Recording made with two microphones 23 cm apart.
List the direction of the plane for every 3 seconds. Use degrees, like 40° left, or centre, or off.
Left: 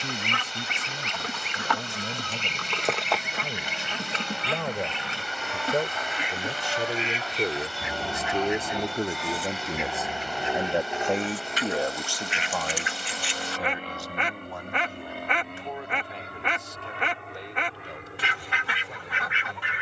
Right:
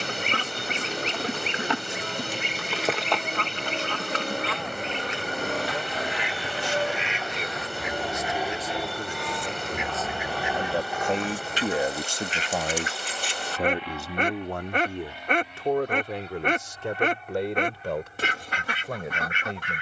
60° right, 50° right, 20° right, 20° left, 40° left, 60° left, 60° left.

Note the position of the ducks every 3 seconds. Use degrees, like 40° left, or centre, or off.
30° right, 20° left, 30° left, 10° right, 40° right, 40° right, 40° right.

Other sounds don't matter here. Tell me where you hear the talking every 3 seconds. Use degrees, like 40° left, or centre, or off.
70° left, 70° left, 50° left, 20° left, 50° right, 70° right, 80° right.